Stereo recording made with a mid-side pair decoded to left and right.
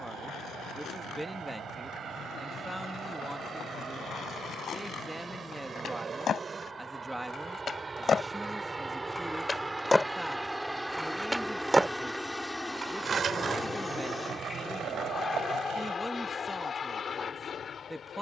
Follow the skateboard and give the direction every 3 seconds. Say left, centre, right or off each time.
left, left, left, centre, right, right.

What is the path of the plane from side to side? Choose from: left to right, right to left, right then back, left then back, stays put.
right to left.